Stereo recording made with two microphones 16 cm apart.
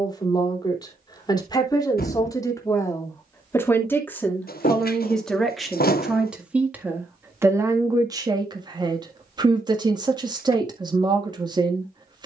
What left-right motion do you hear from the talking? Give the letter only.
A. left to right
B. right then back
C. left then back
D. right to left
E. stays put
A.